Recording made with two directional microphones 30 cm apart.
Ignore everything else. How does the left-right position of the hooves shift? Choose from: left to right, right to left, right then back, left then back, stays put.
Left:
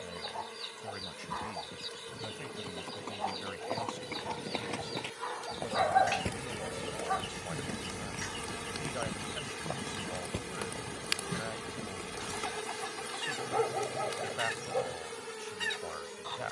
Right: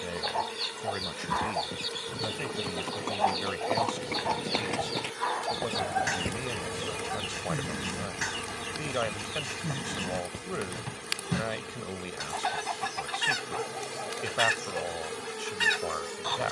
right to left.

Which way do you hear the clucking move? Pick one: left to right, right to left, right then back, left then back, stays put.
stays put.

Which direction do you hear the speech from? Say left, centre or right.
right.